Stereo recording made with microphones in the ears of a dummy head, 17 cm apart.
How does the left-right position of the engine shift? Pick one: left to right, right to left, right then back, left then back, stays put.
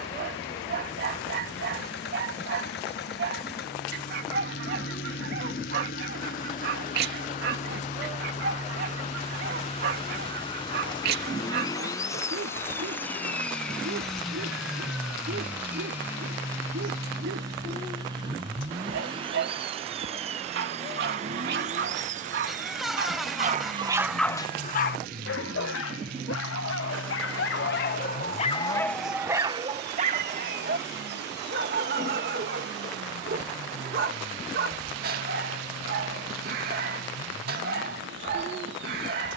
left to right.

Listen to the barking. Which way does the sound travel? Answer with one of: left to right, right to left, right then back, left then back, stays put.
left then back.